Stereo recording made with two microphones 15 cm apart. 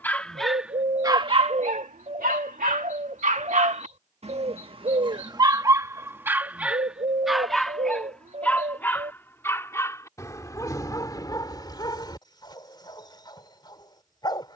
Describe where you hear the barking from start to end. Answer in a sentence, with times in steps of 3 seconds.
You can hear the barking on the right from 0 s, in the centre from 6 s and on the left from 9 s.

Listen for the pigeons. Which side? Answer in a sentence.
In this clip you hear the pigeons on the right.